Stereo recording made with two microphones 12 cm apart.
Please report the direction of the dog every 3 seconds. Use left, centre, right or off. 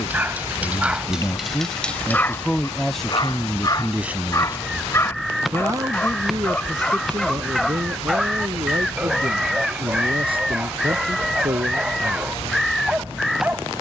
centre, left, centre, centre, centre.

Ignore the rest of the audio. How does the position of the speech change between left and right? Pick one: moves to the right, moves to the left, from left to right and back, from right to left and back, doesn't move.
moves to the right.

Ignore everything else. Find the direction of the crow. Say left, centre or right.
centre.